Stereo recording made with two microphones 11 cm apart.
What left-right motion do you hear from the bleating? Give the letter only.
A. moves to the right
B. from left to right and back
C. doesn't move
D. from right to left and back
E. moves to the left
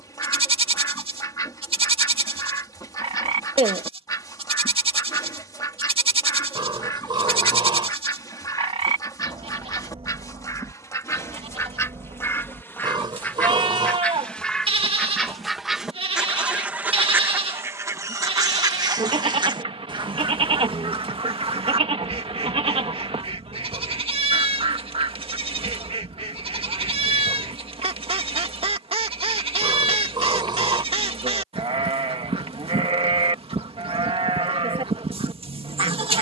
C.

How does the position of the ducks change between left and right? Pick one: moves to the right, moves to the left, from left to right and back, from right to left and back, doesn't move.
moves to the right.